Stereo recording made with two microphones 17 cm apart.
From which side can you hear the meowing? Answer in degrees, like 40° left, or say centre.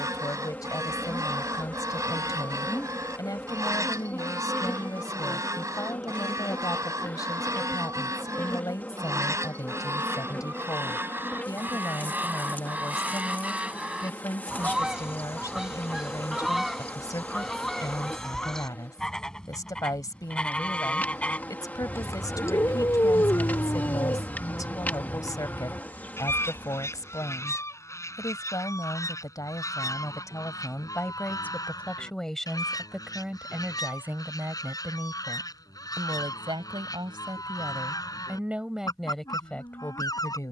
20° left.